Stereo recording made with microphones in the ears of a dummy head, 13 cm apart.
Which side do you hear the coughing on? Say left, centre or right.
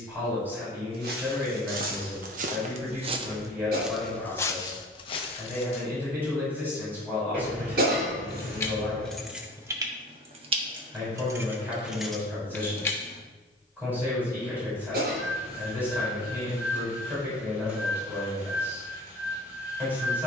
right.